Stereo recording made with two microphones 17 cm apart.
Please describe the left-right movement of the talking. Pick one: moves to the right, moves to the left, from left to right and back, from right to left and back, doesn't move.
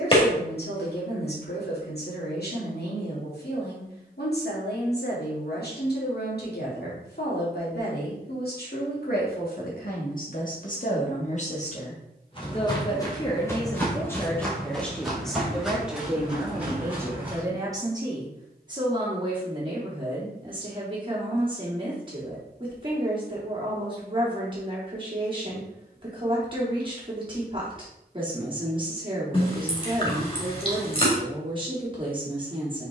moves to the right.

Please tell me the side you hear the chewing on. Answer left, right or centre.
left.